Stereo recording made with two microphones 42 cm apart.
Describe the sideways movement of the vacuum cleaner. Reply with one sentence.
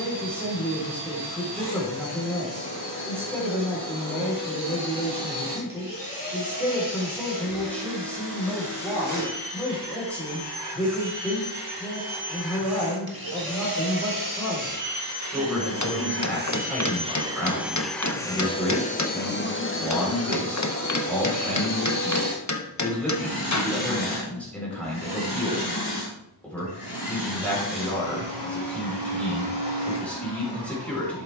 You can hear the vacuum cleaner move to the left.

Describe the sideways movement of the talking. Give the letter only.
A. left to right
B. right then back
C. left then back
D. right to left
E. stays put
E.